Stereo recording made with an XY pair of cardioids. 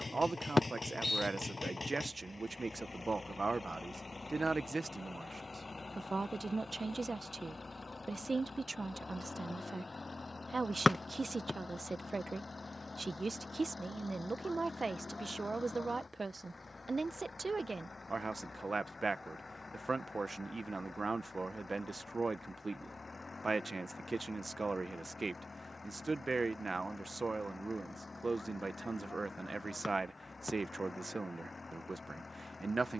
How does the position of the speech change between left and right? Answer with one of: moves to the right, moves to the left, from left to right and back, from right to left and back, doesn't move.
doesn't move.